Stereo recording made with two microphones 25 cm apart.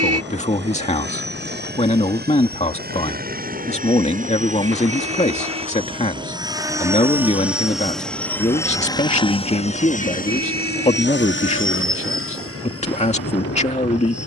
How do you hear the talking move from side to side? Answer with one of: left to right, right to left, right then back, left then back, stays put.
stays put.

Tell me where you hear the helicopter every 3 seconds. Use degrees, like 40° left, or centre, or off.
40° right, 30° right, centre, 40° left, 60° left.